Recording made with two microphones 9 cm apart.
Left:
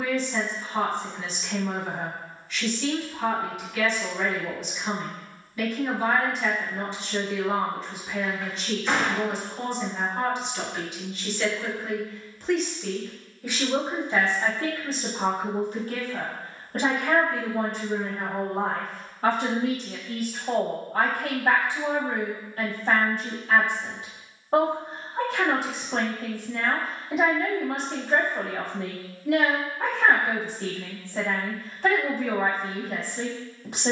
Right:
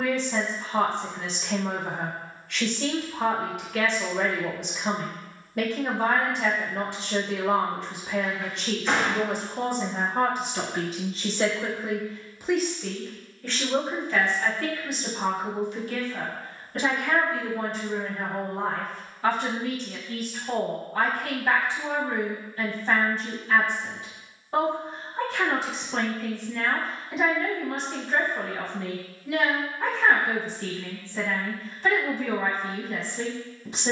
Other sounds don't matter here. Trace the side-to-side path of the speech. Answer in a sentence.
You can hear the speech go from the right side to the left.